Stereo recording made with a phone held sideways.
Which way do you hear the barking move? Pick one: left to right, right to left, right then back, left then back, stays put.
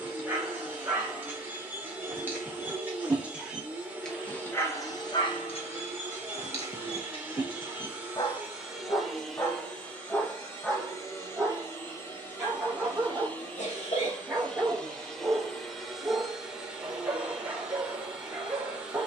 left then back.